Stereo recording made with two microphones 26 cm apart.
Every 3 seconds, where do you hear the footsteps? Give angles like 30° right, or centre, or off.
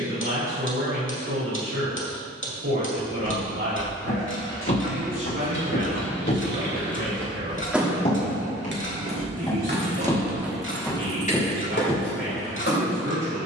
off, 50° left, 40° left, centre, off.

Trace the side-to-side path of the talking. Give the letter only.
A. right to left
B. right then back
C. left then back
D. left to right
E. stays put
E.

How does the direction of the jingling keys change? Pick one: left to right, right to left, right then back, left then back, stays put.
right then back.